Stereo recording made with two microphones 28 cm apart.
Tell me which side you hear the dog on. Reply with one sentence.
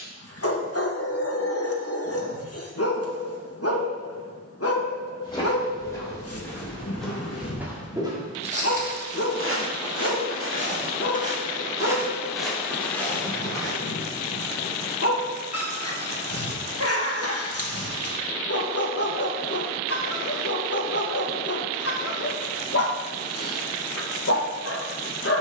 You can hear the dog on the left.